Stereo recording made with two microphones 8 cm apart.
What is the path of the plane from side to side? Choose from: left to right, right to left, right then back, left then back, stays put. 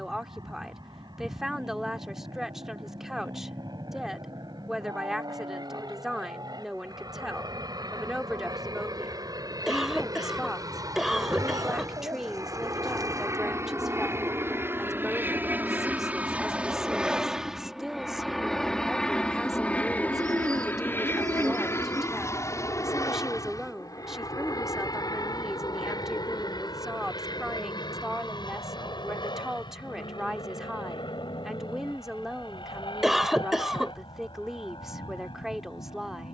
right to left.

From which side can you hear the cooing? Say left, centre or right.
right.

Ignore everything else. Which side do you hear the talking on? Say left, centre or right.
centre.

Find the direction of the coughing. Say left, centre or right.
centre.